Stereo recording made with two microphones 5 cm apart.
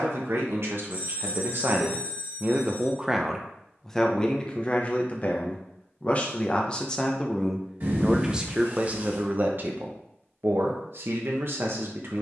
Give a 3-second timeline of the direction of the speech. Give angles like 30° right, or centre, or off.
50° right, 20° left, centre, 50° right.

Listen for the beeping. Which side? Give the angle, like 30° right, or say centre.
50° right.